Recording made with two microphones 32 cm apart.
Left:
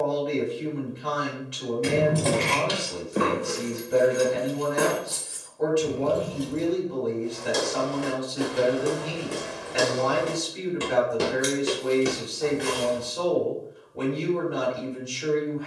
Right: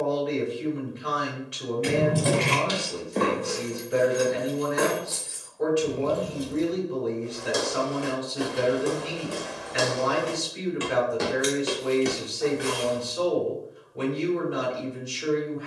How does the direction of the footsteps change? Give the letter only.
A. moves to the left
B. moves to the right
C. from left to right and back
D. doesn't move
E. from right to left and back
E.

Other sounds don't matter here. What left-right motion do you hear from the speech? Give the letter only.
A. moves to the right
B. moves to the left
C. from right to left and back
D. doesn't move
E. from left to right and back
D.